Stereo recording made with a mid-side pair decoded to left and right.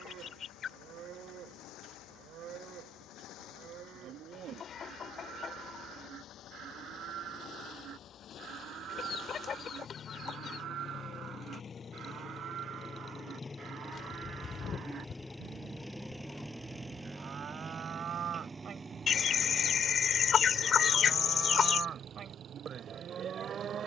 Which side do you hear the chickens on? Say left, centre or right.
left.